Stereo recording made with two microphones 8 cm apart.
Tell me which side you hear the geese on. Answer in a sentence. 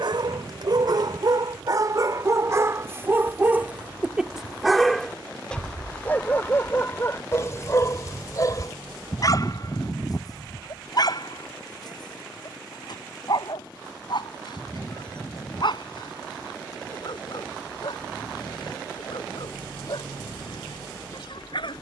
In this clip you hear the geese on the left.